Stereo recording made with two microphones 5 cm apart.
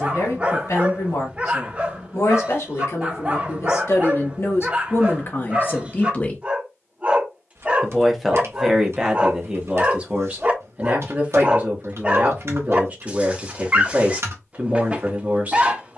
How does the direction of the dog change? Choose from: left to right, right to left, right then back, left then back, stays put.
stays put.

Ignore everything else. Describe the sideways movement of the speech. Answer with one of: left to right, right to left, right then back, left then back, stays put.
left to right.